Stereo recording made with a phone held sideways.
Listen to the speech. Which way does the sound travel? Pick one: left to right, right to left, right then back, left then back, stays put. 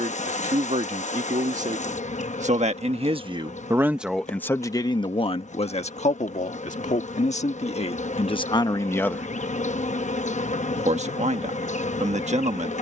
left then back.